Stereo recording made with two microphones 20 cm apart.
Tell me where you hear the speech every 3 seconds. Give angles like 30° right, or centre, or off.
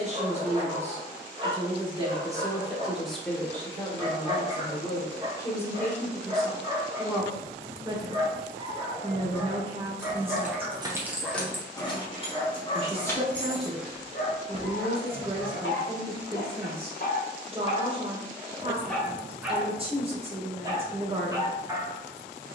30° right, 20° left, 10° right, 30° right, 30° right, 30° right, 30° right, 30° right.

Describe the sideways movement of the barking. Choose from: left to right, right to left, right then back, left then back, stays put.
left then back.